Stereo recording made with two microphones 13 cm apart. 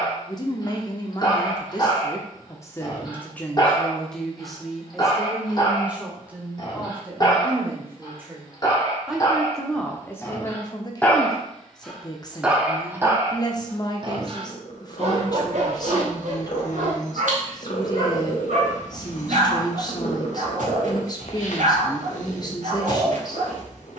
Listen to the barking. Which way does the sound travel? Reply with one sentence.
You can hear the barking travel towards the right.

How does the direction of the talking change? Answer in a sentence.
In this clip you hear the talking go right and come back.